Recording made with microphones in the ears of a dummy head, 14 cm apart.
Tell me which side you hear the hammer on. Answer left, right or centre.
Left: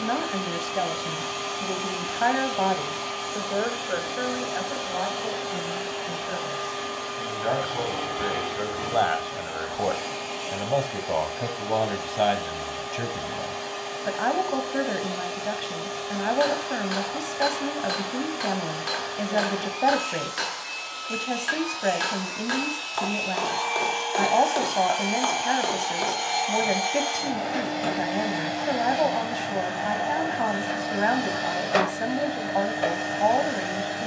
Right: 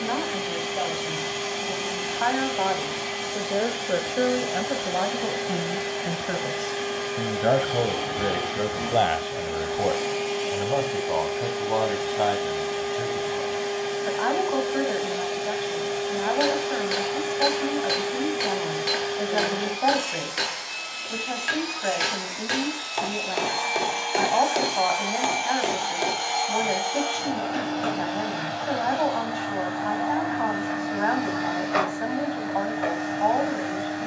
right.